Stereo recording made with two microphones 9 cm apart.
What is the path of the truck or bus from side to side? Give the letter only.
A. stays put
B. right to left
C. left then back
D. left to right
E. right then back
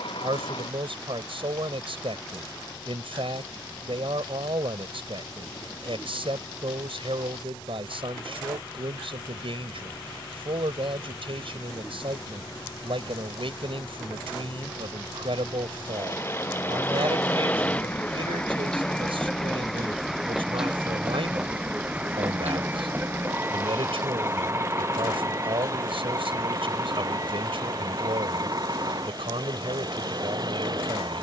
D.